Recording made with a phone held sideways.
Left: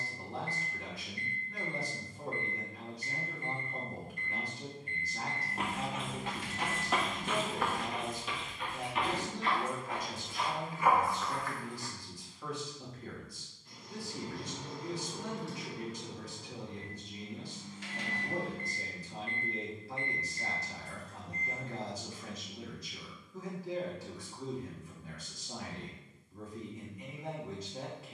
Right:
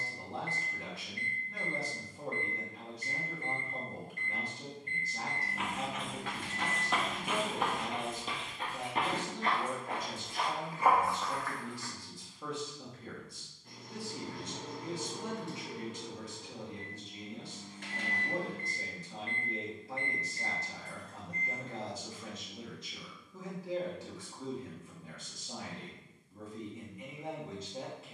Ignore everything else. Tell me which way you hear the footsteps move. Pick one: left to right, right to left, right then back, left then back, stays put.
right then back.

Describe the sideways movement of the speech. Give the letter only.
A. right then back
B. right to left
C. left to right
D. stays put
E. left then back
D.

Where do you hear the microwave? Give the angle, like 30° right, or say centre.
50° right.